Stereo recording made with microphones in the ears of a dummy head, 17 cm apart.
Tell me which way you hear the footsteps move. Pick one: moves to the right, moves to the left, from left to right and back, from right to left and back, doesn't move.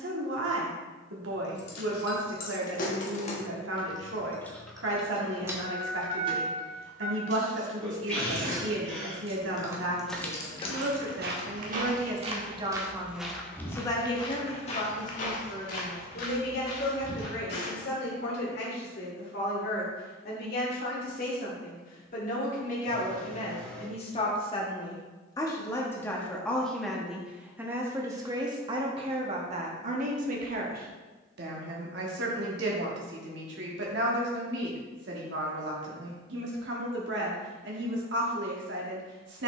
moves to the left.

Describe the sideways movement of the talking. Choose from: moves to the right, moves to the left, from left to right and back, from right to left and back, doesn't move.
from right to left and back.